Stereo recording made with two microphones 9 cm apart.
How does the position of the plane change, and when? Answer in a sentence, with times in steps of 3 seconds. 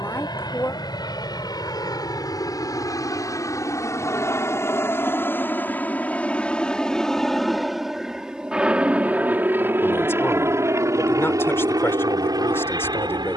You can hear the plane on the left from 0 s, in the centre from 6 s and on the right from 9 s.